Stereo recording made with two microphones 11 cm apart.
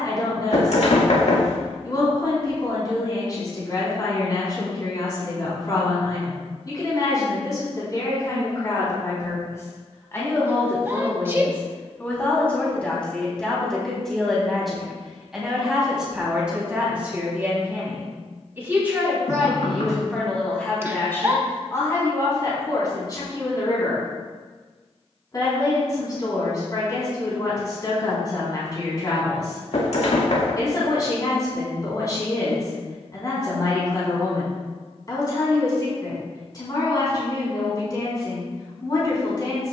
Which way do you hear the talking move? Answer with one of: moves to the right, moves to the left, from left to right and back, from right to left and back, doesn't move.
from left to right and back.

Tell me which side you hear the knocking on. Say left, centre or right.
left.